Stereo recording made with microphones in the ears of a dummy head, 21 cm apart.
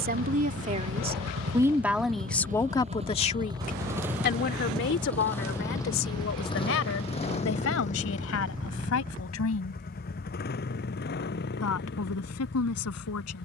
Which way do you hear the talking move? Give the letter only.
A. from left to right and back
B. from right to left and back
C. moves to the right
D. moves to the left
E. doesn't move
D.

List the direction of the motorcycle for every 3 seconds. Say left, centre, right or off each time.
right, centre, left, left, left.